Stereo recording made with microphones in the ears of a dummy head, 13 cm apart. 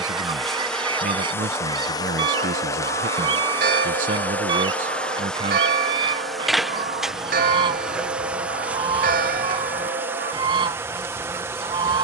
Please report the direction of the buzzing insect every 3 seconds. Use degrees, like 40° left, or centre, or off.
10° left, 10° left, 10° right, 20° right.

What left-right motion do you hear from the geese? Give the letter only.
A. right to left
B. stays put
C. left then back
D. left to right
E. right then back
B.